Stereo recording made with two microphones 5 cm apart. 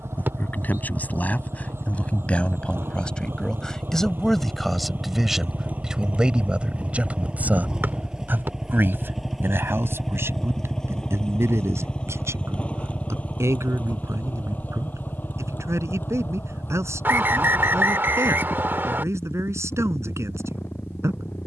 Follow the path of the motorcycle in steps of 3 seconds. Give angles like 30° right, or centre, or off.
60° right, 40° right, 20° right, 10° left, 30° left, 50° left, 50° left.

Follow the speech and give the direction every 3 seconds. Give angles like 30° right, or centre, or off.
30° left, centre, 30° right, 60° right, 70° right, 80° right, 80° right.